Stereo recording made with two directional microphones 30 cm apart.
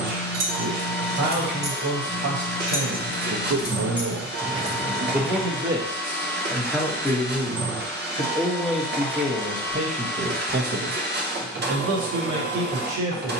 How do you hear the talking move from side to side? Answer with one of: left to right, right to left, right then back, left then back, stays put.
left then back.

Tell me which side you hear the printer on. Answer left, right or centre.
right.